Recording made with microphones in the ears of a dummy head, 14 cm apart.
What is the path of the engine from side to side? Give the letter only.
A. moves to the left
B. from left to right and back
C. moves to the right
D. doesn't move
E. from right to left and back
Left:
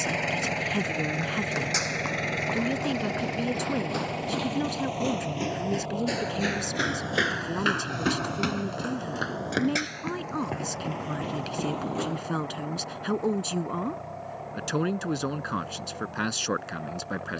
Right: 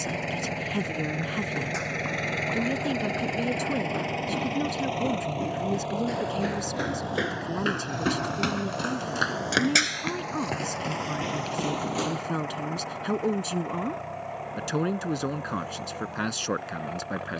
C.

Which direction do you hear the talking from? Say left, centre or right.
centre.